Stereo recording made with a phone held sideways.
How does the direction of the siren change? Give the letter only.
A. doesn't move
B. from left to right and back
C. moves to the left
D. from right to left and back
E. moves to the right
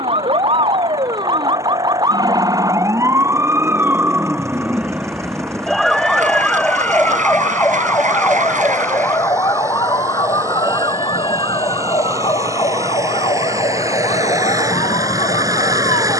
C.